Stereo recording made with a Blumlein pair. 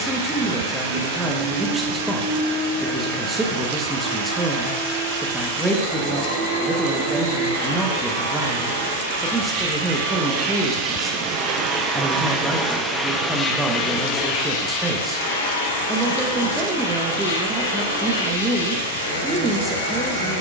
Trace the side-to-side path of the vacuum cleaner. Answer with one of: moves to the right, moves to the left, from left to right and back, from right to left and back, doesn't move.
moves to the left.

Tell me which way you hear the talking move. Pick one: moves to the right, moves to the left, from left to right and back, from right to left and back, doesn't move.
doesn't move.